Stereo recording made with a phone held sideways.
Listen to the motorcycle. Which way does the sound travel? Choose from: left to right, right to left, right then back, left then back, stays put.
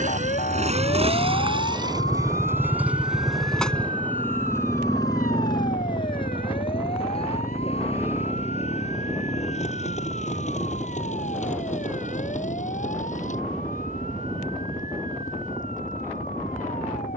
right to left.